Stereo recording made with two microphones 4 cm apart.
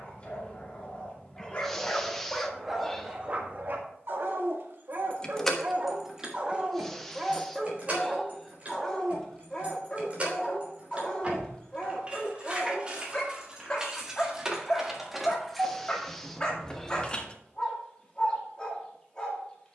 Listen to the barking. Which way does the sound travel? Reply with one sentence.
You can hear the barking go right and come back.